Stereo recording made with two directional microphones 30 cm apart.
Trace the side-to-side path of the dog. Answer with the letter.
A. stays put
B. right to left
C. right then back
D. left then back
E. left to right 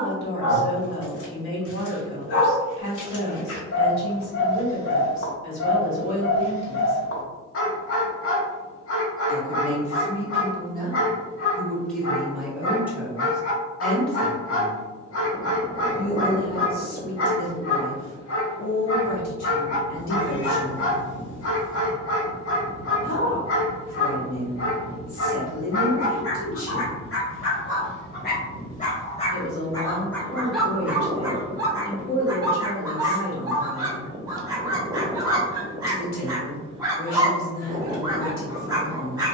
E.